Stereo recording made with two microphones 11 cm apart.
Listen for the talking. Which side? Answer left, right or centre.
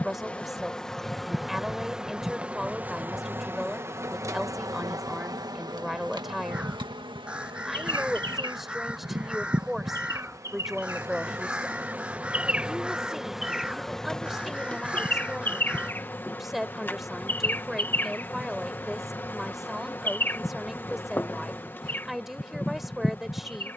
centre.